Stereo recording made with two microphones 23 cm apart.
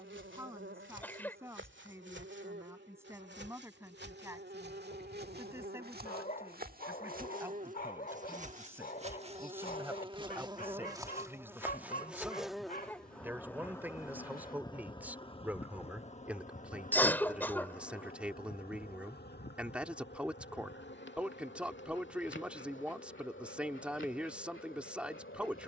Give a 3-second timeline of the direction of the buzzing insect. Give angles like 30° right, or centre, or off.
60° right, 50° right, 40° right, 20° right, 10° left, 30° left, 50° left, 60° left, 70° left.